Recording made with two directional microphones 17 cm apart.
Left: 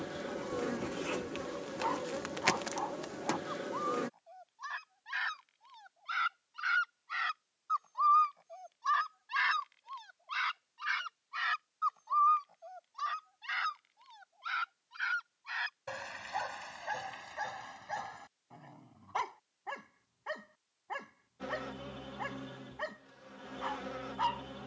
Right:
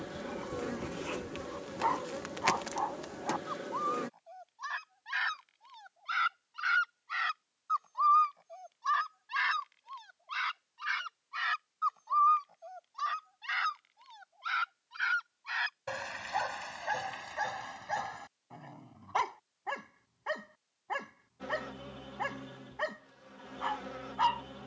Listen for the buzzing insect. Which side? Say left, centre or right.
centre.